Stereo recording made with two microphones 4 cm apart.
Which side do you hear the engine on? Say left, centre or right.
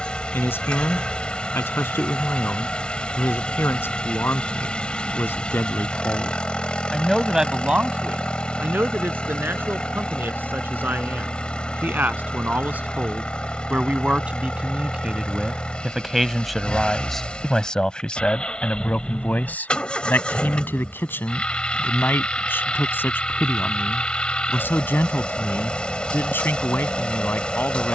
left.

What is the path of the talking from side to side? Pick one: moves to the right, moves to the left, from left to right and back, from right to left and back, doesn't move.
from left to right and back.